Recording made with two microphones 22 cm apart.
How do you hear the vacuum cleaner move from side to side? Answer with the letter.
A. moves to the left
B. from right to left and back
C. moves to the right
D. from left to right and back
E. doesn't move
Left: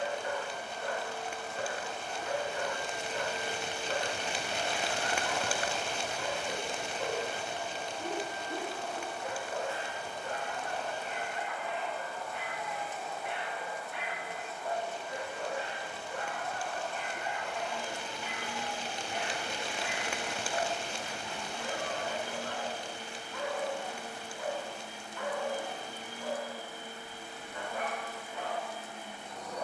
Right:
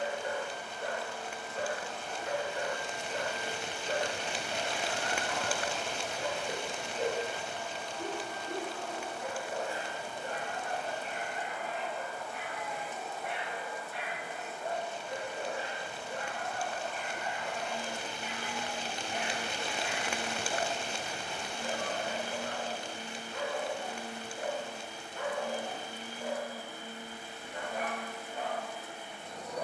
C.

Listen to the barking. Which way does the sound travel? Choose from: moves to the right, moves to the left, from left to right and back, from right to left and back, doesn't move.
doesn't move.